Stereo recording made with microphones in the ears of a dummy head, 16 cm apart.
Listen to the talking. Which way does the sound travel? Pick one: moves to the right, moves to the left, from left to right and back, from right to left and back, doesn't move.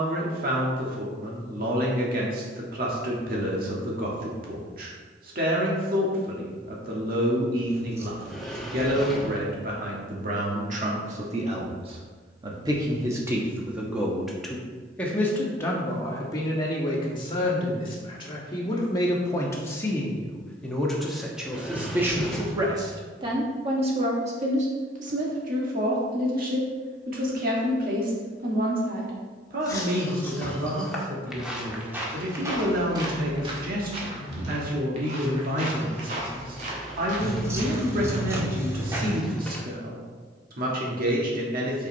from right to left and back.